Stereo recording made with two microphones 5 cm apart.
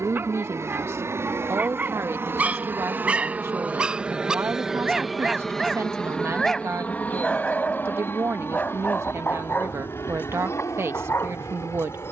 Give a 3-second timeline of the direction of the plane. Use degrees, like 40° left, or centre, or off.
50° right, 10° right, 30° left, 50° left.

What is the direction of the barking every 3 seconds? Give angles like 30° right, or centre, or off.
30° right, 10° right, 20° left, 40° left.